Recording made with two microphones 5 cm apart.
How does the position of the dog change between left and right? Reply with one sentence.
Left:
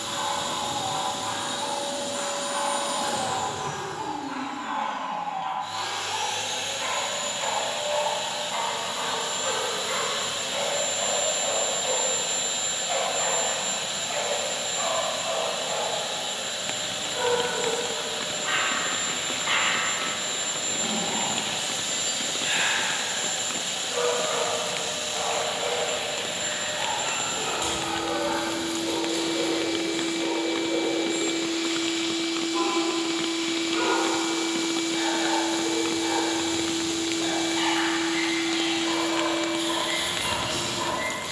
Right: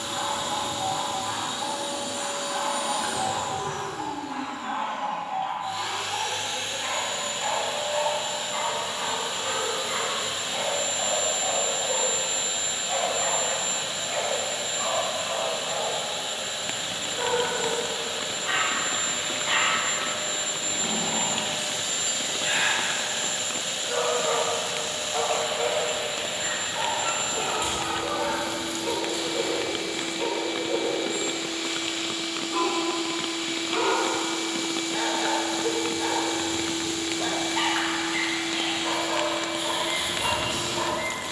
You can hear the dog move to the right.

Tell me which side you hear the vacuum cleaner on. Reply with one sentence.
You can hear the vacuum cleaner in the centre.